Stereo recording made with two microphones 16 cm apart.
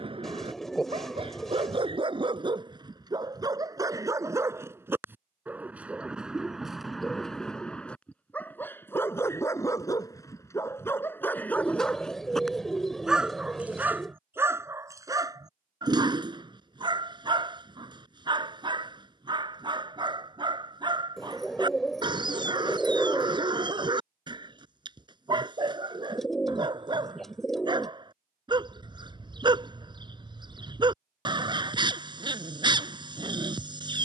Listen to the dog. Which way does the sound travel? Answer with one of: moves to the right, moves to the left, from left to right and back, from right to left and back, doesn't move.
from right to left and back.